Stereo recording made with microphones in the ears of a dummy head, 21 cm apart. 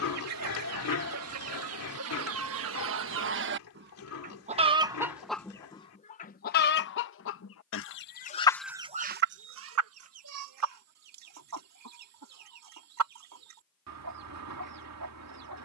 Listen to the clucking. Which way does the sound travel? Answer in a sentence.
In this clip you hear the clucking move from right to left and back again.